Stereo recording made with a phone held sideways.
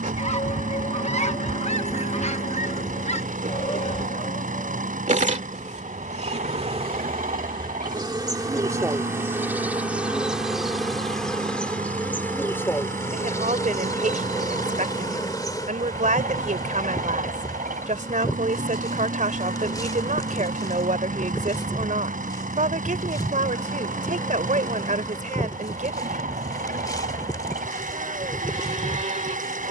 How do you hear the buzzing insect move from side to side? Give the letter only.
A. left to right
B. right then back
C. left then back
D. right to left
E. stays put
D.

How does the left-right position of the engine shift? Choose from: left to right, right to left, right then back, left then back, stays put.
stays put.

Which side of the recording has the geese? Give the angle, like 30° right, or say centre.
50° left.